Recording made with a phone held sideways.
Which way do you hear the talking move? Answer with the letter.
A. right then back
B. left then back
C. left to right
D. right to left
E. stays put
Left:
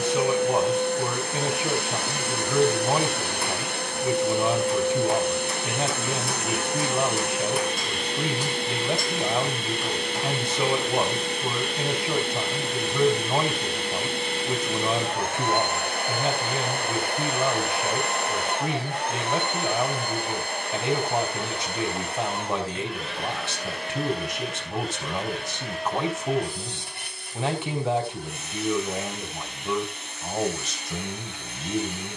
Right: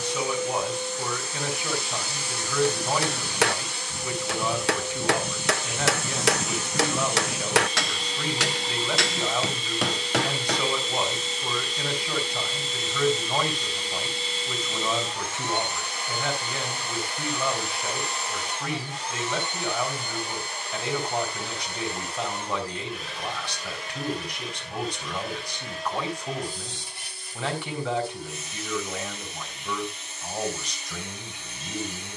E.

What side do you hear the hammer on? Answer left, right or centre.
right.